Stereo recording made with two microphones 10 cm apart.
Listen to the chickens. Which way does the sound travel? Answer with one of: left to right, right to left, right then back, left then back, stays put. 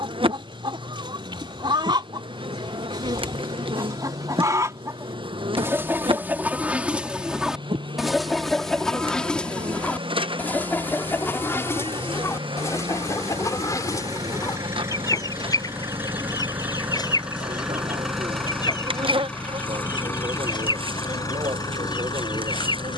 right to left.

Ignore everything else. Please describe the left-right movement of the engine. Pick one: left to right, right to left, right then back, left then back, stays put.
right to left.